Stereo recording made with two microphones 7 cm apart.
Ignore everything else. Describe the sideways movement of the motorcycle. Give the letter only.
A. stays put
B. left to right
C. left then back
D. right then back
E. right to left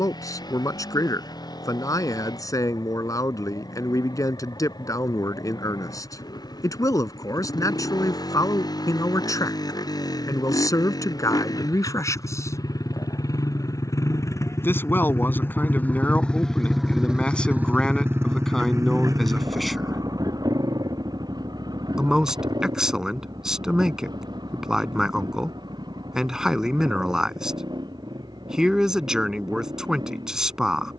B.